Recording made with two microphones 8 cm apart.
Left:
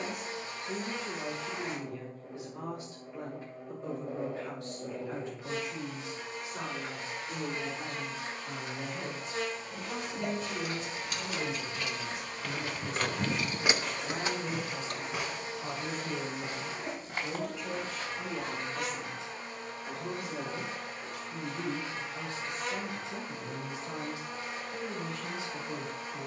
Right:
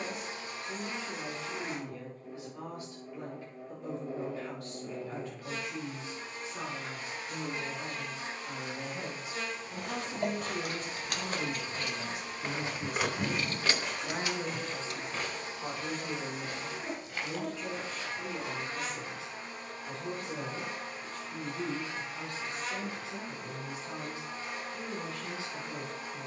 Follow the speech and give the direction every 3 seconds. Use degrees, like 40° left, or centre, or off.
20° left, 20° left, 10° left, 40° right, 50° right, 10° right, 10° left, 20° left, 20° left.